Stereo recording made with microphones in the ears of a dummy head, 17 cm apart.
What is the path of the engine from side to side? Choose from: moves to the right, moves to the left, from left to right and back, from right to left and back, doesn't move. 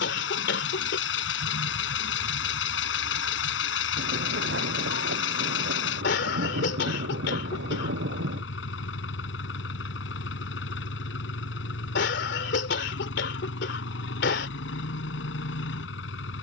doesn't move.